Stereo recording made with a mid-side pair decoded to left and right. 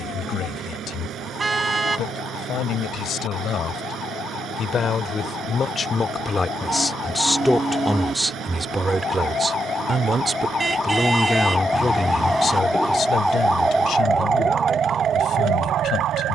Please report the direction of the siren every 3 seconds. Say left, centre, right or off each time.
left, left, left, left, centre, right.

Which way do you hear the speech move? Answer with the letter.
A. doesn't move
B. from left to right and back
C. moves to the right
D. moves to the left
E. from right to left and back
B.